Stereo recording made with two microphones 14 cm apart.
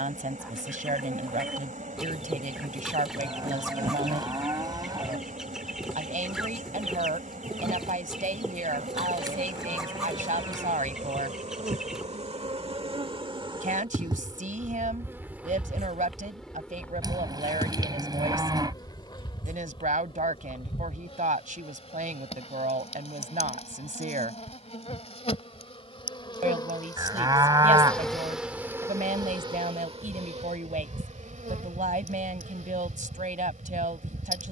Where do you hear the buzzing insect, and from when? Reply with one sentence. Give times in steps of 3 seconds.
In this clip you hear the buzzing insect on the right from 0 s, in the centre from 15 s, on the left from 18 s, in the centre from 27 s and on the right from 30 s.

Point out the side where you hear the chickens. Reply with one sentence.
In this clip you hear the chickens in the centre.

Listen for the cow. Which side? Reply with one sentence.
In this clip you hear the cow on the right.